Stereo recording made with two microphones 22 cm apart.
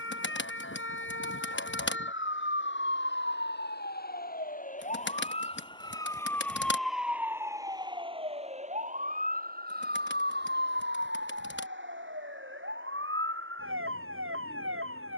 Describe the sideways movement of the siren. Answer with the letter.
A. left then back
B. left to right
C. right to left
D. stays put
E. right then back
B.